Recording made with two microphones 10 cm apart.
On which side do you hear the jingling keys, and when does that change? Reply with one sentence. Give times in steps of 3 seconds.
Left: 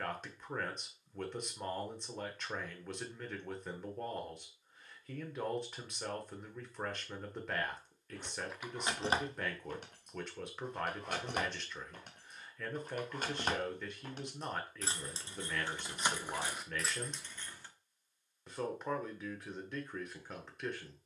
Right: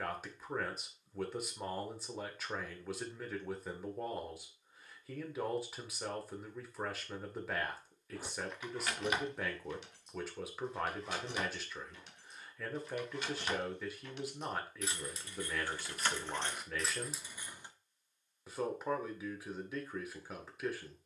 You can hear the jingling keys not at all from 0 s, in the centre from 6 s, on the left from 9 s, in the centre from 15 s and not at all from 18 s.